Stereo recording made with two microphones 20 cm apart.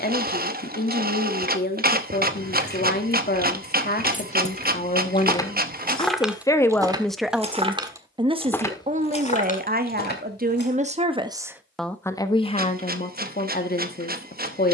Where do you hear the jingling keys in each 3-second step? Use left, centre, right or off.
left, left, centre, left, off.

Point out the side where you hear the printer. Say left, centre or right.
right.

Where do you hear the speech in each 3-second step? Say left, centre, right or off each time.
left, left, centre, right, left.